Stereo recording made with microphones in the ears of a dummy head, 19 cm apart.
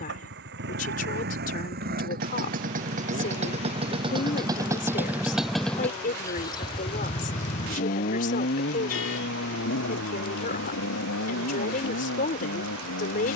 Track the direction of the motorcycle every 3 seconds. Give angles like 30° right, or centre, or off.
50° right, 20° right, 30° left, 60° left, 70° left.